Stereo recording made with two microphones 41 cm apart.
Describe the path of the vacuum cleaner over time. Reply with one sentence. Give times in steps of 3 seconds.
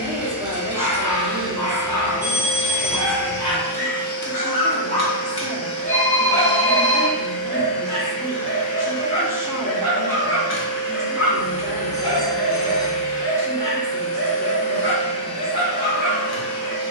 In this clip you hear the vacuum cleaner on the right from 0 s and on the left from 3 s.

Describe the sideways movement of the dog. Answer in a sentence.
In this clip you hear the dog move from left to right.